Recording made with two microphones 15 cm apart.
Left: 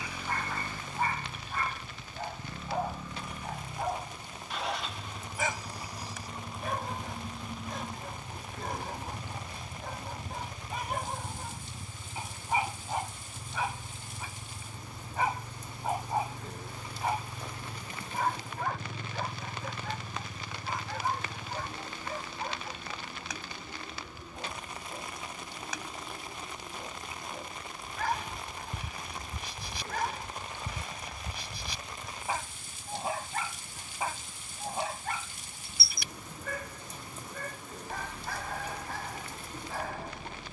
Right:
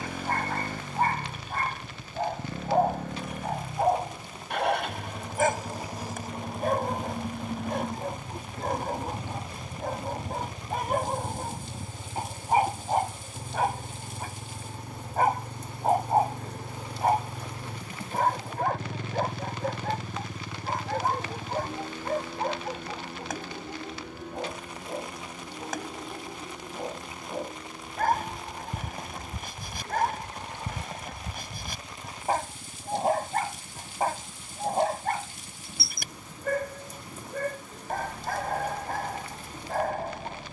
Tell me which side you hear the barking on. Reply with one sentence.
You can hear the barking on the right.